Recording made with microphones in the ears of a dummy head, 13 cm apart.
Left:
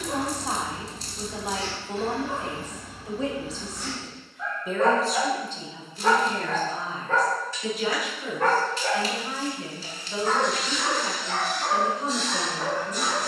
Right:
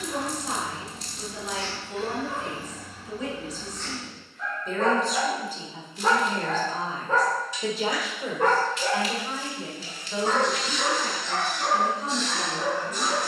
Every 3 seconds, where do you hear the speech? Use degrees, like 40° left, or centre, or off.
30° left, 10° left, 30° right, centre, 20° left.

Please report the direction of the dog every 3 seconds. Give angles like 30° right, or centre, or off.
30° left, 10° left, 10° right, 20° right, 30° right.